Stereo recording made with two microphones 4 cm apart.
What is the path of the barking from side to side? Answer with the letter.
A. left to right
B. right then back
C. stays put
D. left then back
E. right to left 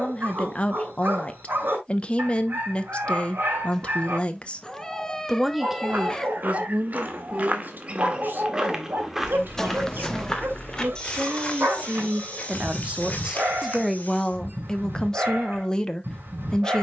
C.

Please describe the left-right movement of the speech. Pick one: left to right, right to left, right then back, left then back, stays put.
right then back.